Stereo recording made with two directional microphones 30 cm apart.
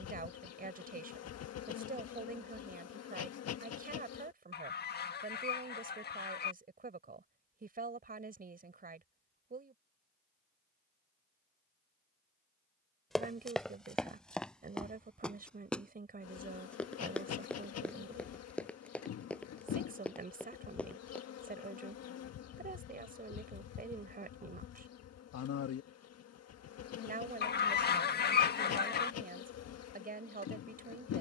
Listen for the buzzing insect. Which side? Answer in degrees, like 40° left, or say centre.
60° left.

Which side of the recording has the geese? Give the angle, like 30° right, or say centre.
30° left.